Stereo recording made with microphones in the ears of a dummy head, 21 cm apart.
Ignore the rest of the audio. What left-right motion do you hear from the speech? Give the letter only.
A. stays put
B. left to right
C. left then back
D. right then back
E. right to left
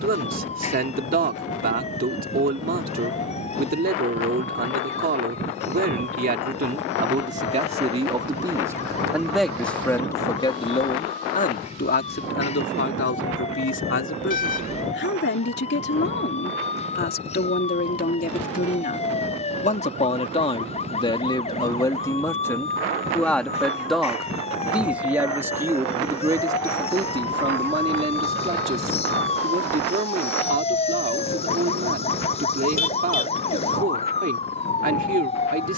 C.